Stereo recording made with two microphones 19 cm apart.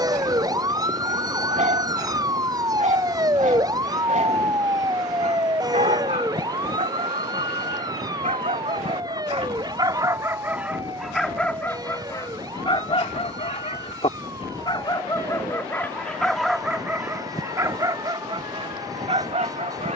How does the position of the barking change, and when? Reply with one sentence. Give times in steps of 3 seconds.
In this clip you hear the barking on the right from 0 s, in the centre from 9 s, on the left from 12 s, in the centre from 15 s and on the right from 18 s.